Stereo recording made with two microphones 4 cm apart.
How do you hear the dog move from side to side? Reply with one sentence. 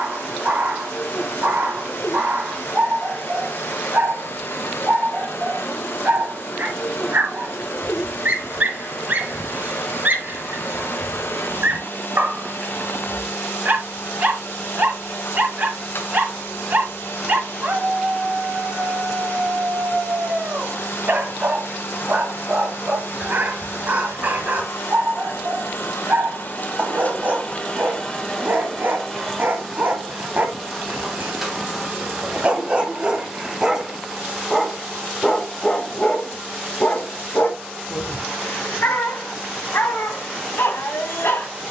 In this clip you hear the dog travel towards the left.